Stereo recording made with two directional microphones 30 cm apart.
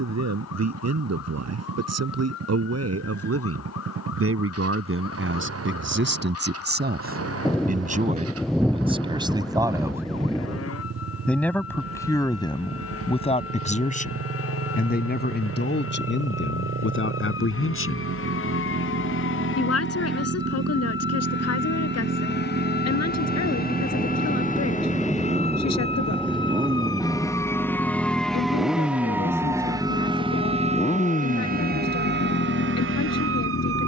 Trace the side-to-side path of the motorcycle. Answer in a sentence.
You can hear the motorcycle go from the right side to the left.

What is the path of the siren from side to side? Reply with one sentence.
You can hear the siren move from left to right.